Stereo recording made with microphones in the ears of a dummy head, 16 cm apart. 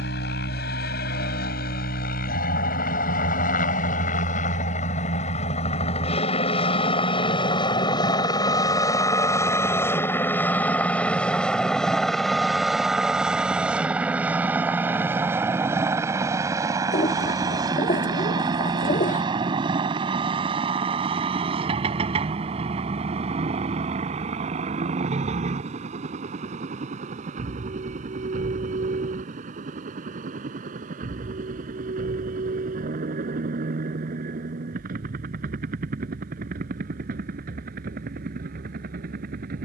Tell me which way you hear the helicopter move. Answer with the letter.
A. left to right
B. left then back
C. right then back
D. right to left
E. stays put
A.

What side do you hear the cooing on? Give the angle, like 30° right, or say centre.
40° left.